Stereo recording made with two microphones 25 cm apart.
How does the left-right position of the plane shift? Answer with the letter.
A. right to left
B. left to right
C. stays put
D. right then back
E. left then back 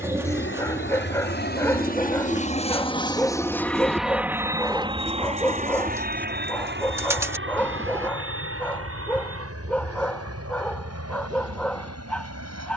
B.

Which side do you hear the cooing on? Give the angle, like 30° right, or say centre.
10° right.